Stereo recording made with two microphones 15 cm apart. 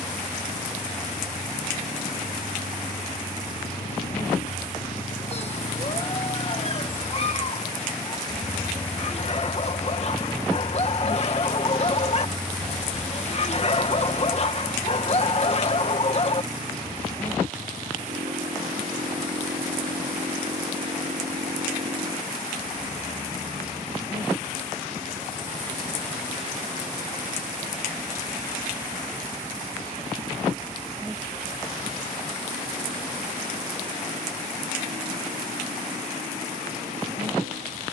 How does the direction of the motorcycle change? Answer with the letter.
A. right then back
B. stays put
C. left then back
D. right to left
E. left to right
E.